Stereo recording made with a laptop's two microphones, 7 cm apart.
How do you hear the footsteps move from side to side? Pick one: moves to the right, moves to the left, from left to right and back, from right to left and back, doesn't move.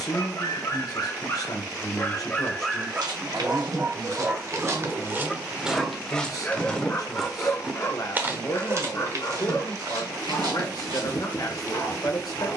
from right to left and back.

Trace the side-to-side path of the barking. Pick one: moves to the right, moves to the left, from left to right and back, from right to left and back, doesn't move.
from left to right and back.